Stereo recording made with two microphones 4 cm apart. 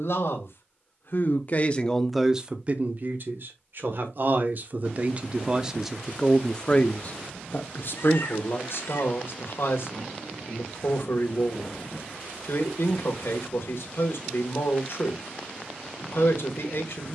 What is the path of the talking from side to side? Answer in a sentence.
You can hear the talking move from left to right and back again.